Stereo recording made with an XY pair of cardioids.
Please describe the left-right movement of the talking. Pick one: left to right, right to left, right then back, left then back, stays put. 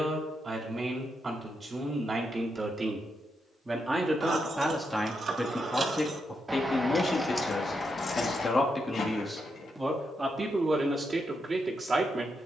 left then back.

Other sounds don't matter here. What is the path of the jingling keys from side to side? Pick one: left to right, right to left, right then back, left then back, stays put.
right to left.